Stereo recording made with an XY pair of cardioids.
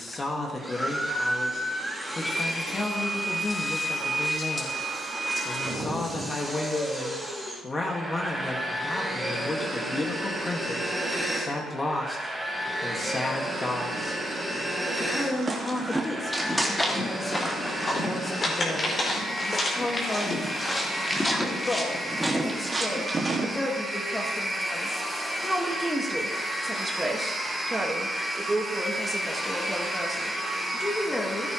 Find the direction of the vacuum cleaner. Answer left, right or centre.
centre.